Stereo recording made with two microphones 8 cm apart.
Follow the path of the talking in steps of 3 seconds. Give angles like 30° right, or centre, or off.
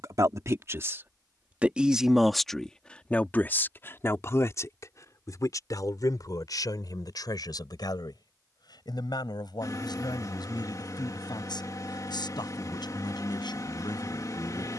20° right, 40° left, 60° left, 70° left, 70° left.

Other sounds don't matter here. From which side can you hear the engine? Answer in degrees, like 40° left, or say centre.
50° left.